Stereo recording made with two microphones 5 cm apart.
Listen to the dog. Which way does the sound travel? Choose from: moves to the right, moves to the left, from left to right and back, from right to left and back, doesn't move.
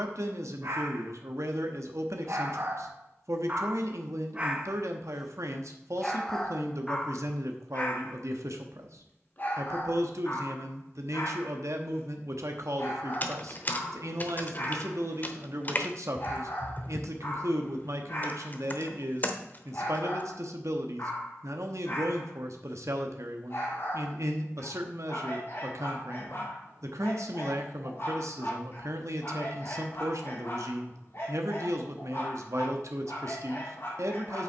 moves to the left.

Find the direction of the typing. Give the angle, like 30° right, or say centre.
40° left.